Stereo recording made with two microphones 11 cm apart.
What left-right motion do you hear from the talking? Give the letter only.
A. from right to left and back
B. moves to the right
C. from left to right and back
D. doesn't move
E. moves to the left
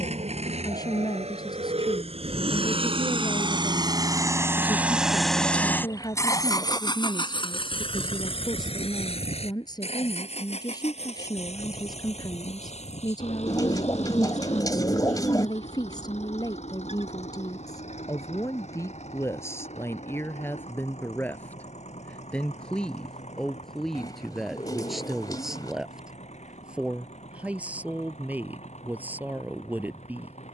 B.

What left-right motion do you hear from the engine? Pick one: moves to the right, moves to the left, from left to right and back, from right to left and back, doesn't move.
moves to the left.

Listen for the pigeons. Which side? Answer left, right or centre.
left.